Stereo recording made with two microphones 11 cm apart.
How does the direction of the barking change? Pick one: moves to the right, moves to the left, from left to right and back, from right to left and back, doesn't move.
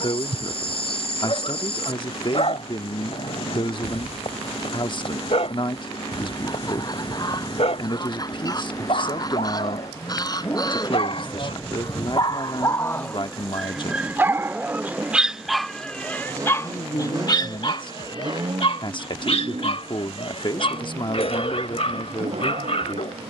from left to right and back.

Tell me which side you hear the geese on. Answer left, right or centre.
left.